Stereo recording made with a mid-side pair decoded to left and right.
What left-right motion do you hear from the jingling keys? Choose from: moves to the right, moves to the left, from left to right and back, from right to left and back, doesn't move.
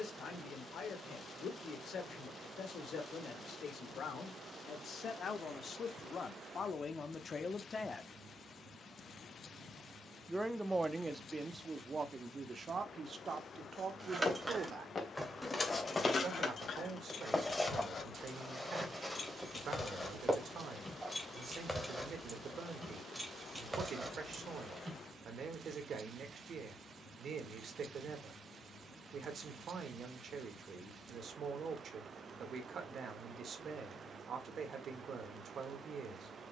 from right to left and back.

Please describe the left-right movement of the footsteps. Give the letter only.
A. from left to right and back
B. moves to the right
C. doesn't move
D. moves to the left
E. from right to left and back
B.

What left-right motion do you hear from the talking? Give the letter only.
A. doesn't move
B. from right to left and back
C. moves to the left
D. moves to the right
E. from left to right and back
D.